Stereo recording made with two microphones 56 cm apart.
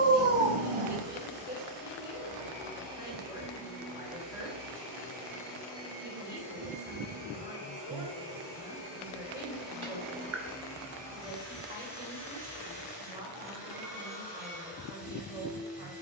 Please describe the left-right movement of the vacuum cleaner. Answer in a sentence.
You can hear the vacuum cleaner travel towards the left.